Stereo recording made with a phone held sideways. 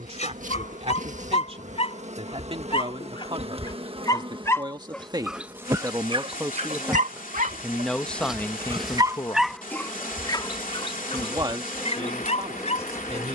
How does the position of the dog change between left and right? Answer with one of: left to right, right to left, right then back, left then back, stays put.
right then back.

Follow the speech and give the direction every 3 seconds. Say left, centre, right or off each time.
right, right, centre, centre, right.